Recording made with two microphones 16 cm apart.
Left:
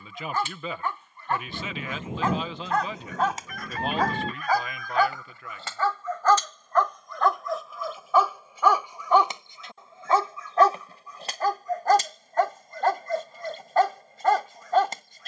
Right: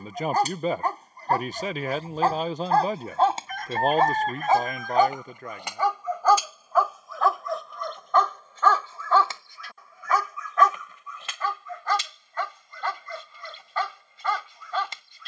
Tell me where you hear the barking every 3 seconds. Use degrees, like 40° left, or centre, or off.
40° right, 20° right, centre, 30° left, 50° left.